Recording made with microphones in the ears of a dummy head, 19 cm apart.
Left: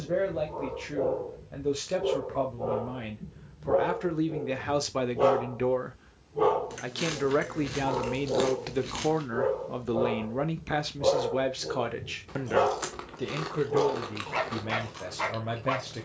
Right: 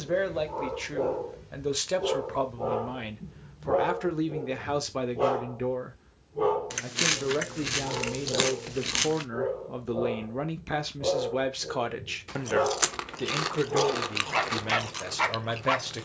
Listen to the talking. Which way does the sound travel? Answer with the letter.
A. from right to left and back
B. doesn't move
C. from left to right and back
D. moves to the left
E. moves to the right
A.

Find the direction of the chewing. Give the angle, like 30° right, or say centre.
50° right.